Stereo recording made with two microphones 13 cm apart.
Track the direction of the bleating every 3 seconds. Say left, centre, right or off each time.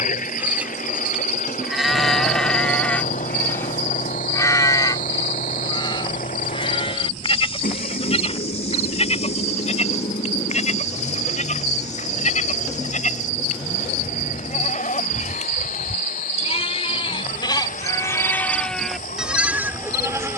centre, left, left, left, left, left, centre.